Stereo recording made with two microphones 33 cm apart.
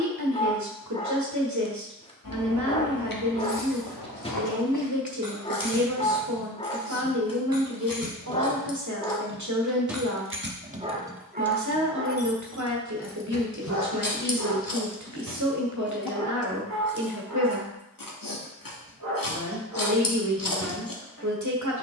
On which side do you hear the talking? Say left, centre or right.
right.